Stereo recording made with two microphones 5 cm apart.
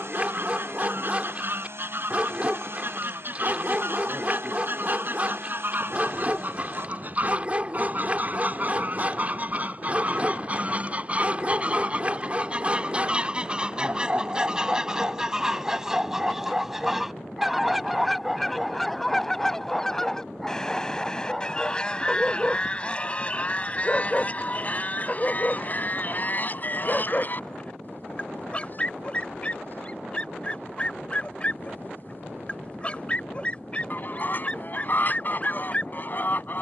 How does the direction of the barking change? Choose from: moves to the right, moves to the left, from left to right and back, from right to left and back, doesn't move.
moves to the left.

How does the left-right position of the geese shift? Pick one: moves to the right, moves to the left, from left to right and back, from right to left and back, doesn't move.
moves to the left.